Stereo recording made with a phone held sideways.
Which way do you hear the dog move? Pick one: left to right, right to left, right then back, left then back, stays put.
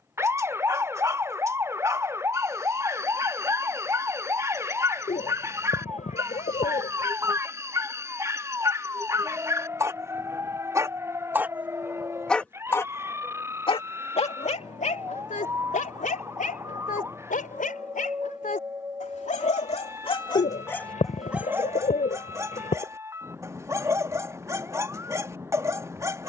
left then back.